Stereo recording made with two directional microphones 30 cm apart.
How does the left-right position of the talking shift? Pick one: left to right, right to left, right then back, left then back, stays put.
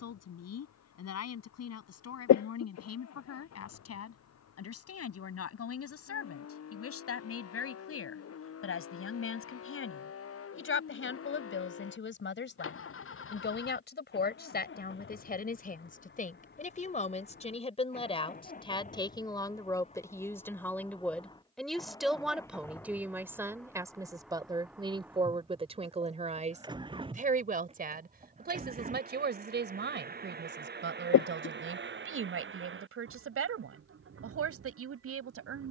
left to right.